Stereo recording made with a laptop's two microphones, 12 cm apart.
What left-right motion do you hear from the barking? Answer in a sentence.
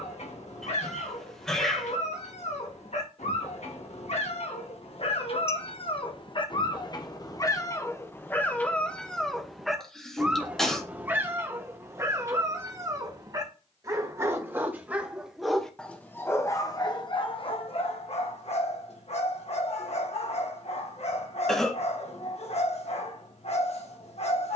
In this clip you hear the barking move from left to right and back again.